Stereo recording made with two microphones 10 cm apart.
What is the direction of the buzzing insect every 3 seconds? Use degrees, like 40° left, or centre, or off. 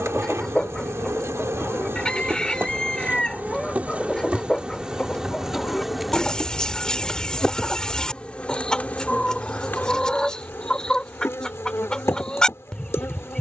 30° right, 10° right, 10° left, 20° left, 30° left.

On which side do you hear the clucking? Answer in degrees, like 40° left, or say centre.
10° left.